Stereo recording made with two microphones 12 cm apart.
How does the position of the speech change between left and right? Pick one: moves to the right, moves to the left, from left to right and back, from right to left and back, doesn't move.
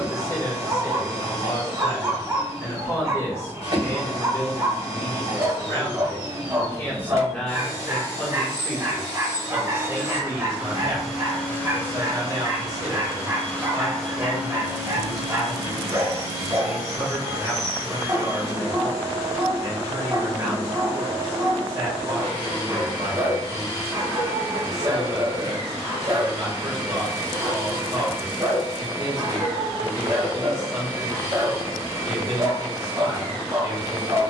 moves to the right.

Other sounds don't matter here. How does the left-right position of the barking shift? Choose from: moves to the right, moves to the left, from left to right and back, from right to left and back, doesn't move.
doesn't move.